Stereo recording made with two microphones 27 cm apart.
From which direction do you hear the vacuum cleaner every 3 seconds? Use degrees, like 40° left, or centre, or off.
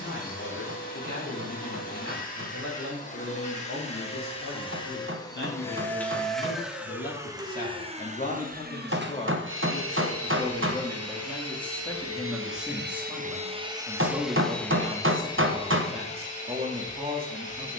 30° left, 20° left, 20° right, 60° right, 20° right, 20° left.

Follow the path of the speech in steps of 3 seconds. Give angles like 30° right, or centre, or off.
50° left, 50° left, 30° left, 10° left, 10° right, 20° right.